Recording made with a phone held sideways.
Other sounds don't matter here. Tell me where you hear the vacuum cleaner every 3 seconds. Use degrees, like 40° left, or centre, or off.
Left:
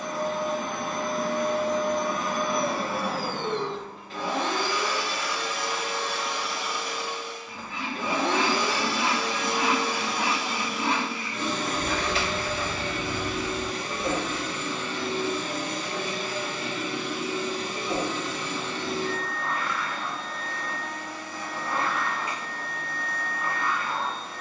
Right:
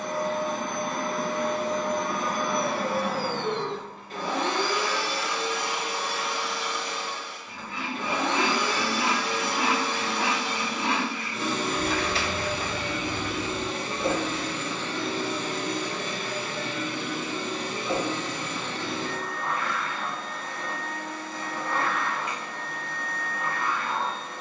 60° right, 40° right, 20° left, 10° left, 20° right, 40° right, 50° right, 60° right.